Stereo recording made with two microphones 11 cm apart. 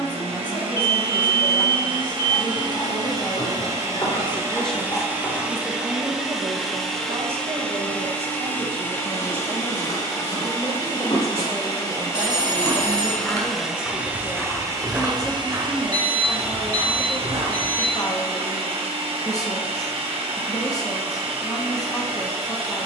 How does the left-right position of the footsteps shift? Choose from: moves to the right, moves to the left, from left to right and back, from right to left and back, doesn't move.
moves to the right.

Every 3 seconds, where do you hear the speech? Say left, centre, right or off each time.
left, centre, right, right, centre, left, left, left.